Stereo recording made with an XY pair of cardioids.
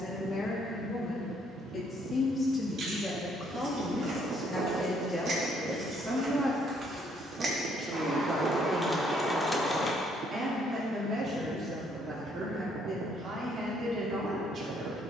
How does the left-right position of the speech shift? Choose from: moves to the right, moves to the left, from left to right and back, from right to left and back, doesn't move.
moves to the right.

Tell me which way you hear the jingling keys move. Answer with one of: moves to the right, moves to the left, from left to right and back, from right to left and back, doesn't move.
moves to the left.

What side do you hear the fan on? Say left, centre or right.
right.